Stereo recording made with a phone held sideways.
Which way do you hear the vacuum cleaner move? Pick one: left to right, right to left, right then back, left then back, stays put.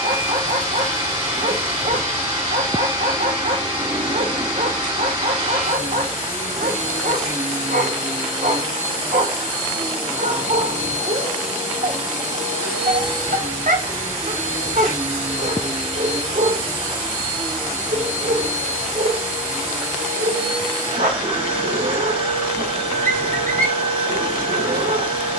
stays put.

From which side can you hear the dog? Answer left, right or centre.
right.